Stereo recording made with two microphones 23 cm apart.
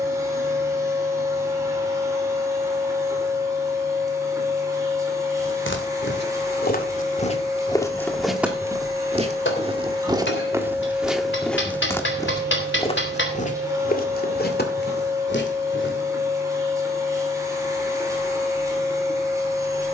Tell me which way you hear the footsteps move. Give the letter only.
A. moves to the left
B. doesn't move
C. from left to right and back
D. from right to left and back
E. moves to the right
C.